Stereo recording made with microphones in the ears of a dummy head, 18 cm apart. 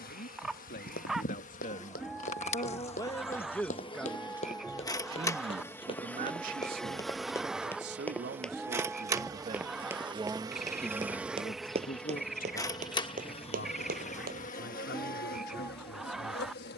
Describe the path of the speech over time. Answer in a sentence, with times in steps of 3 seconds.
In this clip you hear the speech on the left from 0 s, in the centre from 3 s, on the right from 6 s, in the centre from 9 s and on the left from 12 s.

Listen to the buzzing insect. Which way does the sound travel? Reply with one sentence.
In this clip you hear the buzzing insect move from left to right and back again.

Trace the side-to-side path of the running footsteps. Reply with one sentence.
In this clip you hear the running footsteps travel towards the right.